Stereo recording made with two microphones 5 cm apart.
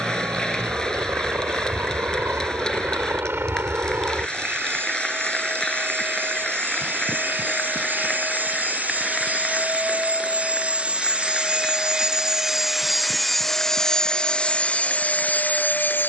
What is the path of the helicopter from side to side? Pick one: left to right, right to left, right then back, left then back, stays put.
right to left.